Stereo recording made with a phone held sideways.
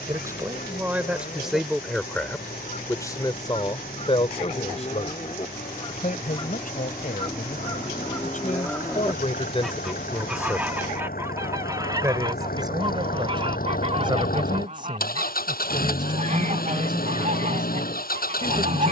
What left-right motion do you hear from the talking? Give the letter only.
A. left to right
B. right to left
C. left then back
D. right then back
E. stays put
C.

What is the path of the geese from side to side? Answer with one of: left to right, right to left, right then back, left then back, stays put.
left to right.